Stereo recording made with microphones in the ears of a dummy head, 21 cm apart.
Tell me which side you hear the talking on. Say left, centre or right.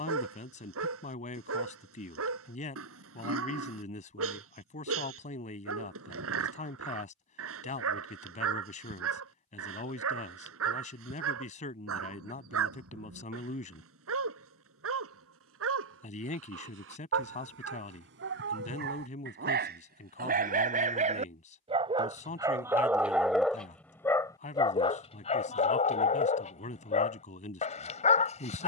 left.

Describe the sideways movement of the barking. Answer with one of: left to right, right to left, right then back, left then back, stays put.
right to left.